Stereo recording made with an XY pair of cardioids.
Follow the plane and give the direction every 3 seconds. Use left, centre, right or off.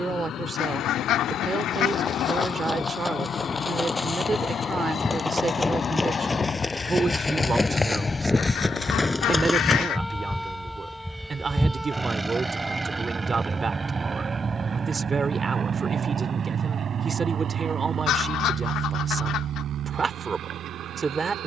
left, left, left, centre, right, right, right.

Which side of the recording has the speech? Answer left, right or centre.
right.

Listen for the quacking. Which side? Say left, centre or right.
left.